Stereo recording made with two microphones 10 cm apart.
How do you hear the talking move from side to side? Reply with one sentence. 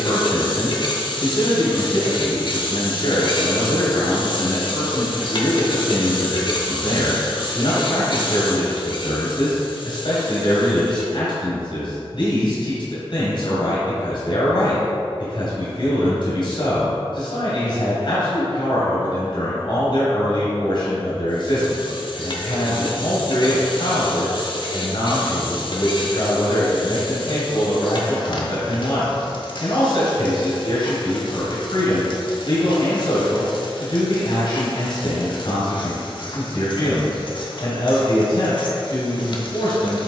You can hear the talking stay put.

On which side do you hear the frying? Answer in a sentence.
In this clip you hear the frying on the left.